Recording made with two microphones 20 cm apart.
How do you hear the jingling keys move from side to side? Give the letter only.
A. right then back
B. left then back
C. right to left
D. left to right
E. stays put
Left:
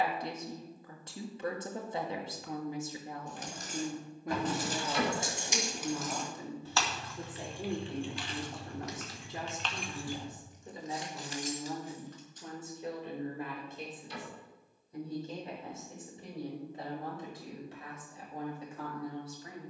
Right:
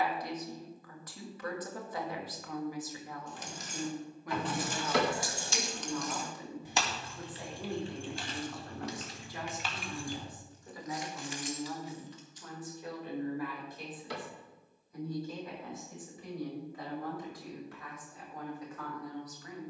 A.